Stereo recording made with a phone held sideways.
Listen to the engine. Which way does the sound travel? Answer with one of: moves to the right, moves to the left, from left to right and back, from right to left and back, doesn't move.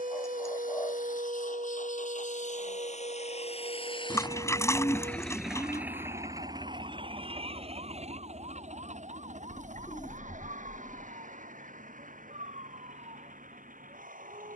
moves to the right.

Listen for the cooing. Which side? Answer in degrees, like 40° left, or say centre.
20° left.